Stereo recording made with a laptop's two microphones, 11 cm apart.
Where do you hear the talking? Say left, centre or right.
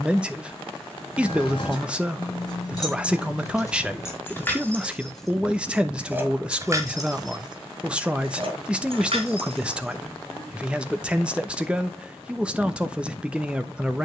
centre.